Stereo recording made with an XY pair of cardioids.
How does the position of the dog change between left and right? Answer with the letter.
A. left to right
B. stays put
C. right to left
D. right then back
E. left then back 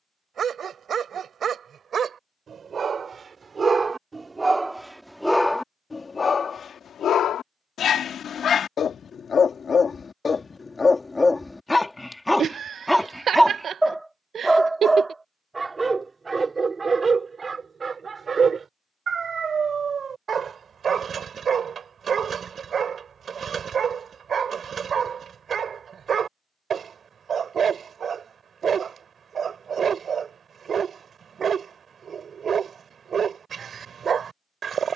E.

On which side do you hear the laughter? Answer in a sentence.
In this clip you hear the laughter on the right.